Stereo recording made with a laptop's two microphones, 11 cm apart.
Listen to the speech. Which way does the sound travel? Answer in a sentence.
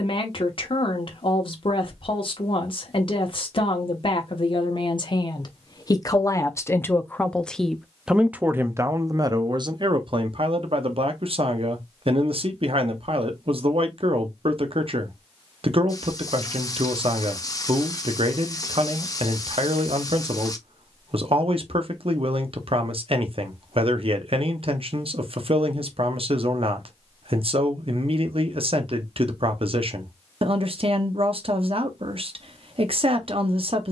In this clip you hear the speech travel towards the right.